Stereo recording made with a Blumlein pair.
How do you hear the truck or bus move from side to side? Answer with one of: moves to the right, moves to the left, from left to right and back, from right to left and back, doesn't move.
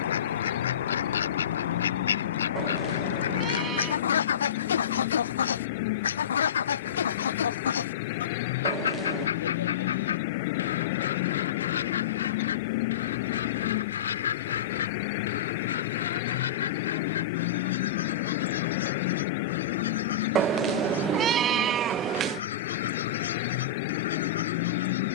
doesn't move.